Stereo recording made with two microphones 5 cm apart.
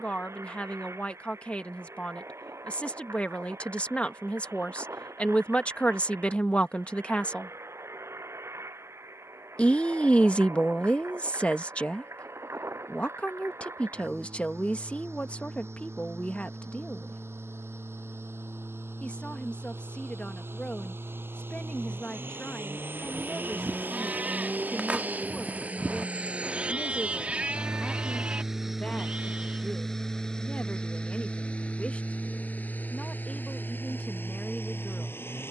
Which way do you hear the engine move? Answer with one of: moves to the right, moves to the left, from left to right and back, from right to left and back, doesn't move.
moves to the left.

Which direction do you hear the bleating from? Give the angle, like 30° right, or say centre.
30° right.